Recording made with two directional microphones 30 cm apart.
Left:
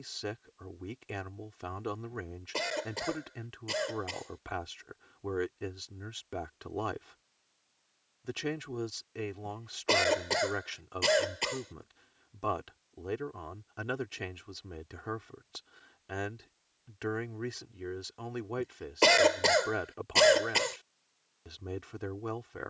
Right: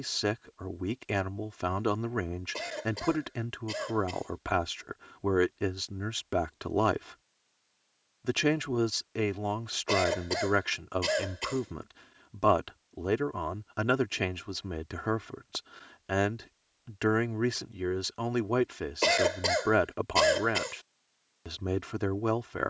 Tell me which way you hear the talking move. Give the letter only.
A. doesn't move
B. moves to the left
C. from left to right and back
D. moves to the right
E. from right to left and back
A.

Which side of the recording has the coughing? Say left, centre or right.
left.